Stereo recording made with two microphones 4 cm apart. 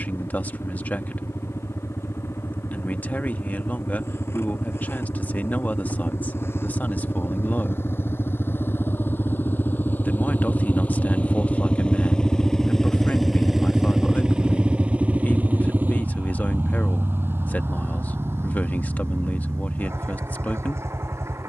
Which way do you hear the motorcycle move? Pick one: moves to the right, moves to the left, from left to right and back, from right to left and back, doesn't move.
moves to the right.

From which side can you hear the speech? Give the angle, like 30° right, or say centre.
40° left.